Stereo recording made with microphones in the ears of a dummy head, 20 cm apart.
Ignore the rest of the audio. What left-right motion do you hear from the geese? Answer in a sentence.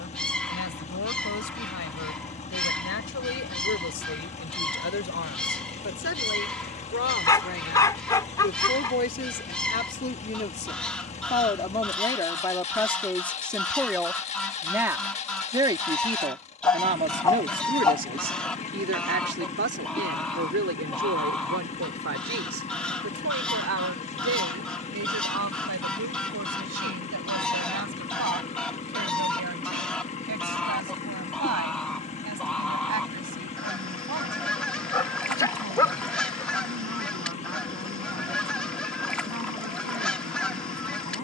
In this clip you hear the geese stay put.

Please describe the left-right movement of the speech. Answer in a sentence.
In this clip you hear the speech move to the right.